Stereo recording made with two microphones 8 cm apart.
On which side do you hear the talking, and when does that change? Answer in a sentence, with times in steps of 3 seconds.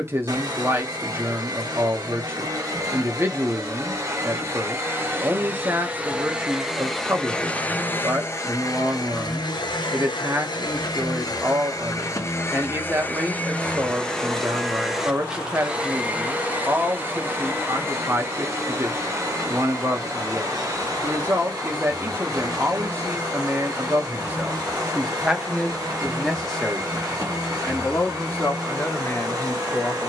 You can hear the talking on the right from 0 s, in the centre from 24 s and on the left from 27 s.